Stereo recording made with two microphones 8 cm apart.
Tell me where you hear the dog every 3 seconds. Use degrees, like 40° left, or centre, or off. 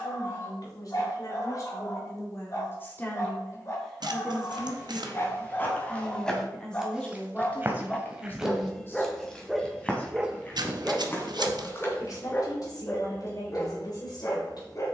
40° left, 40° left, 20° left, centre, 40° left.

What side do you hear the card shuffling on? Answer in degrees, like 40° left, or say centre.
70° right.